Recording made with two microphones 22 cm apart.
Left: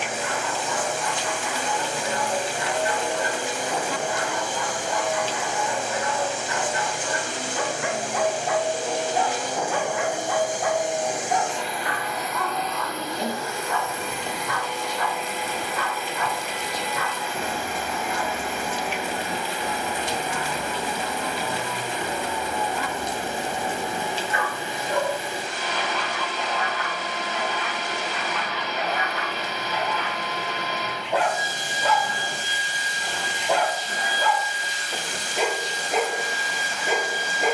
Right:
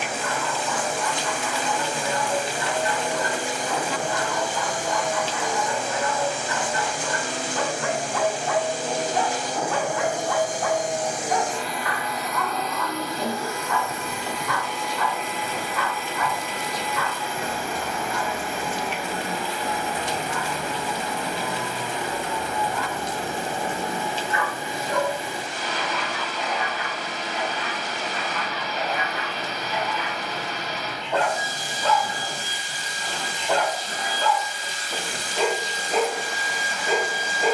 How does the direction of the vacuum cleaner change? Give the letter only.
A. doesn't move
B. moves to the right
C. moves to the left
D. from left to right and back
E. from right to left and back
A.